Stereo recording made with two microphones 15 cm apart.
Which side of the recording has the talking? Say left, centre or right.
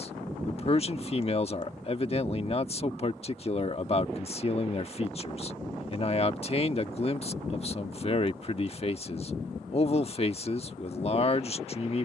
left.